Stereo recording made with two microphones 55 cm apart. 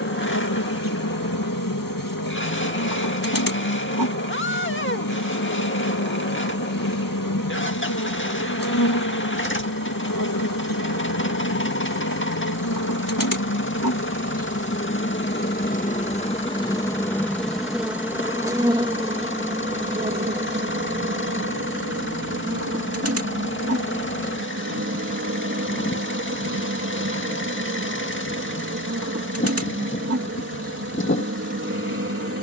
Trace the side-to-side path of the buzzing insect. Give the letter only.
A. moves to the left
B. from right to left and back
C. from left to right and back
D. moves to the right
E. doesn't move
D.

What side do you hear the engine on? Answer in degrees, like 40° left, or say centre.
20° left.